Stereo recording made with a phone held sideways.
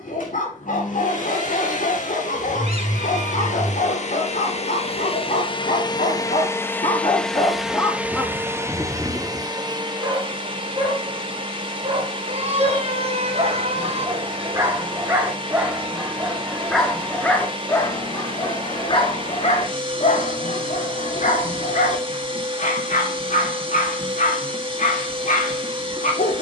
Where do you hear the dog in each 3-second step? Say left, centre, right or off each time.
left, left, left, right, right, centre, left, left, left.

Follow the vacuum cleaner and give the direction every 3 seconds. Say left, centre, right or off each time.
left, left, centre, right, right, right, right, right, right.